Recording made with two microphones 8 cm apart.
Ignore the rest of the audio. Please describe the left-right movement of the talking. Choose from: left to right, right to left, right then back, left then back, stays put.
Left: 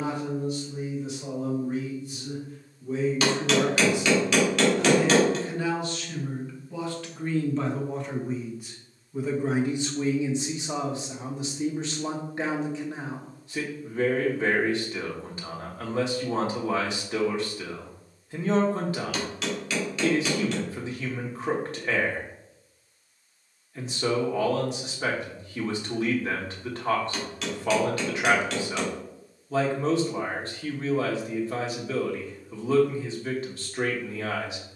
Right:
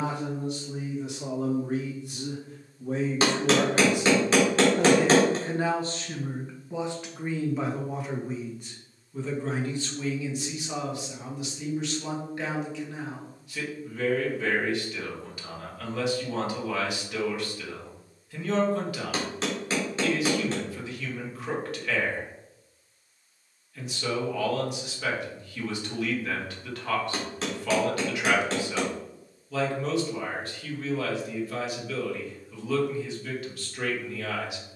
right to left.